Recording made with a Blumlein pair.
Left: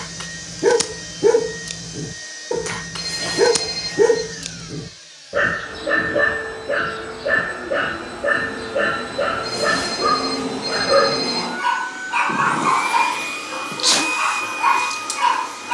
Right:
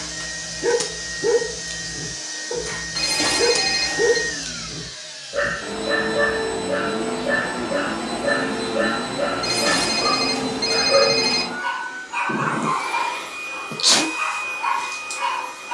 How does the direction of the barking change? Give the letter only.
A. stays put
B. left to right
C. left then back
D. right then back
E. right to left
A.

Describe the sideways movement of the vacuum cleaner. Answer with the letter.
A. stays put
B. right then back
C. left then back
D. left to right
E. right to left
E.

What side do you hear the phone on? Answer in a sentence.
You can hear the phone on the right.